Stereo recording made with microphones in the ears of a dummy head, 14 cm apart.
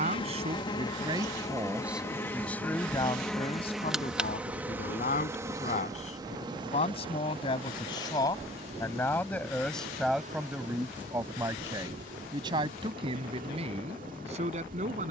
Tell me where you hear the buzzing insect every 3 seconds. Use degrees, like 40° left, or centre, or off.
20° left, 10° right, 30° right, 50° right, 60° right.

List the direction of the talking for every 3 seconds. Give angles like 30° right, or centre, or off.
20° right, 40° left, 30° left, centre, 40° right.